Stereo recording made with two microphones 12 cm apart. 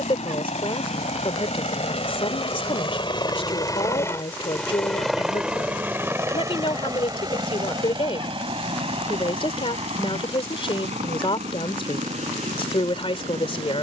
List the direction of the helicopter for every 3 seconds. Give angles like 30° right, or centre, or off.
60° left, 10° left, 30° right, 50° right, 60° right.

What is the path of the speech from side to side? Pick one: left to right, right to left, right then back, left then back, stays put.
stays put.